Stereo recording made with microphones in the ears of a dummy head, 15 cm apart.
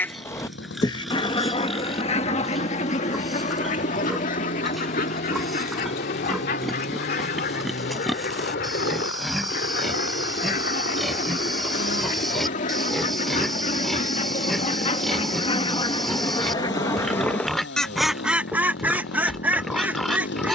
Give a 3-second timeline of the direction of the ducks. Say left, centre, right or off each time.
left, left, left, left, left, left, centre.